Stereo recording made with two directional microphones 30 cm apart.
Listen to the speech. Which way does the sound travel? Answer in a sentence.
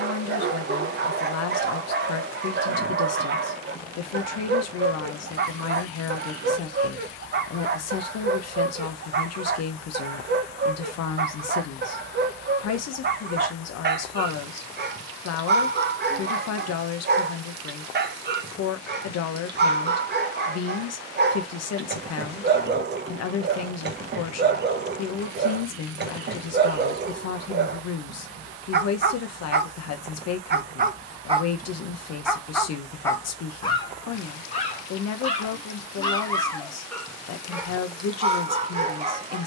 In this clip you hear the speech stay put.